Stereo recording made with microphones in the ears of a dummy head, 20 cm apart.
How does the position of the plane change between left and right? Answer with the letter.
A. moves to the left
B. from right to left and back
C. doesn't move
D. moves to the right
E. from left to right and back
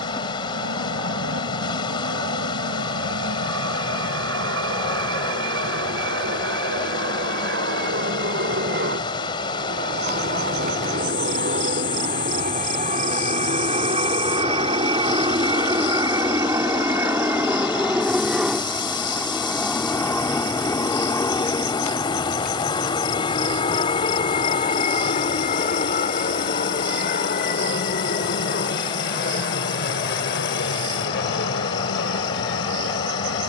A.